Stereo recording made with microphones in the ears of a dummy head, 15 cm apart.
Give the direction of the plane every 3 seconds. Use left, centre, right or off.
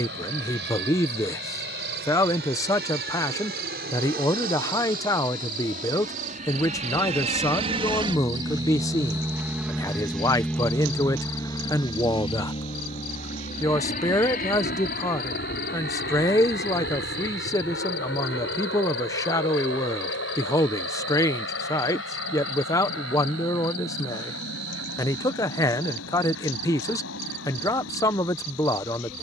right, right, right, centre, left, left, left, left, left, left.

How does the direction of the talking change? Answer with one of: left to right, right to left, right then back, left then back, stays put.
stays put.